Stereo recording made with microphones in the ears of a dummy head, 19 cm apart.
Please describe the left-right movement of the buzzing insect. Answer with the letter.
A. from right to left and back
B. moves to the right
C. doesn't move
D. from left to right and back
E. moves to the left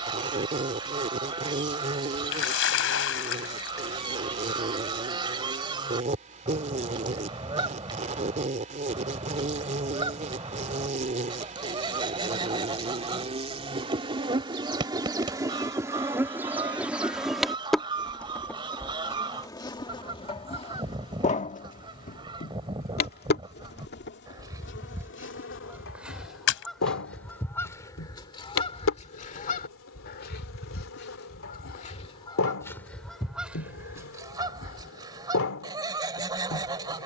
E.